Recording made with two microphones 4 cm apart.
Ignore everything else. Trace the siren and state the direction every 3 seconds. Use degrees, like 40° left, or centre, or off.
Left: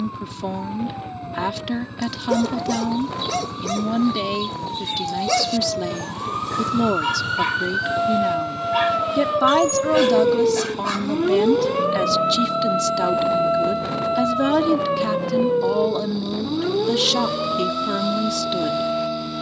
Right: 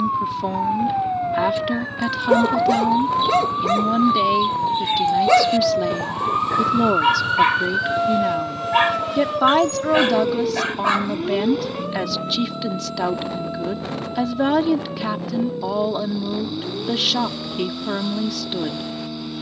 60° right, 40° right, 10° right, 30° left, 50° left, 60° left, 70° left.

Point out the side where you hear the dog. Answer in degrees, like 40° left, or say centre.
30° right.